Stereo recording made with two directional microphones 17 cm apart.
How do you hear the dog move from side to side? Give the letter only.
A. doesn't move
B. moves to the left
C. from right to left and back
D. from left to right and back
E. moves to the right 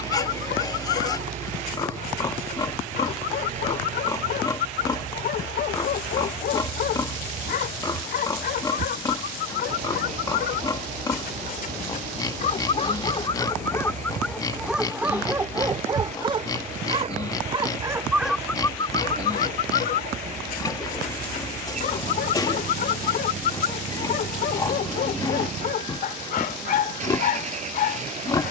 D.